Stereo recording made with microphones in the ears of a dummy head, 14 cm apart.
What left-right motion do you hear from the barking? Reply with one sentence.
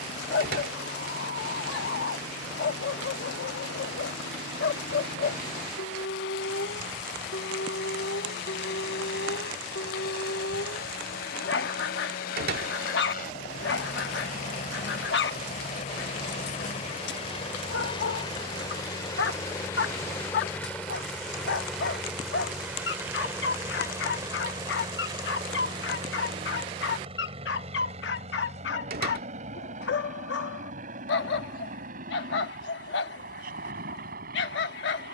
You can hear the barking stay put.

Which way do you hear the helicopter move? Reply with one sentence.
In this clip you hear the helicopter travel towards the right.